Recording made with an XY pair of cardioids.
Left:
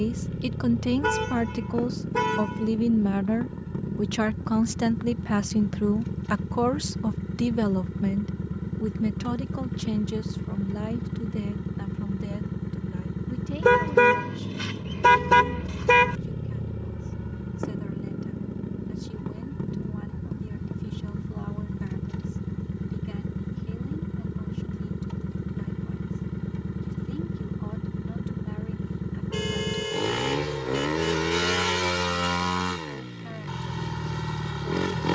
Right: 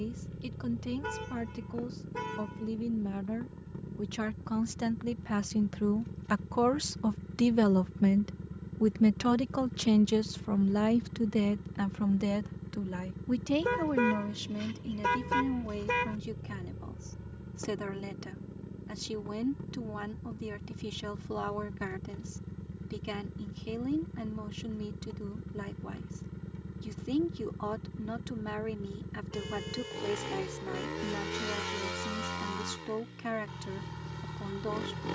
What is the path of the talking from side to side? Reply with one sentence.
In this clip you hear the talking travel towards the right.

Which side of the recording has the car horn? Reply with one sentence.
You can hear the car horn on the left.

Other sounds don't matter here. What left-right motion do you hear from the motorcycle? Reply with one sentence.
In this clip you hear the motorcycle stay in one place.